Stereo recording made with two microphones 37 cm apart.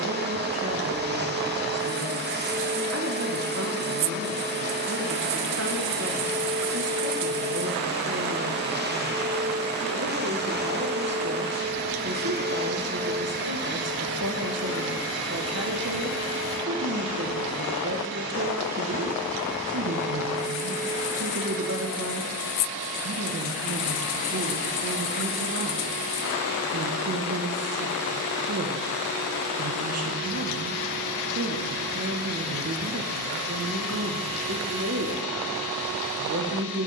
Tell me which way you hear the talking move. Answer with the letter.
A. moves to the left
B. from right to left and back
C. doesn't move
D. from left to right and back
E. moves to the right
C.